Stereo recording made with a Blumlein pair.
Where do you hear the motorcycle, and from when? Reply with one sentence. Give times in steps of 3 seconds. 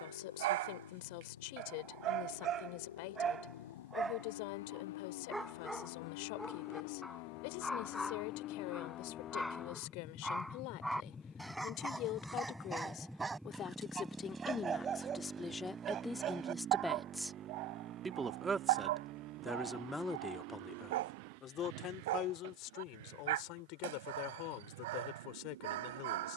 In this clip you hear the motorcycle on the left from 0 s, in the centre from 12 s and on the right from 15 s.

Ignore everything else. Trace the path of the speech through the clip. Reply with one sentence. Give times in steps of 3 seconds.
You can hear the speech on the left from 0 s, in the centre from 15 s and on the left from 21 s.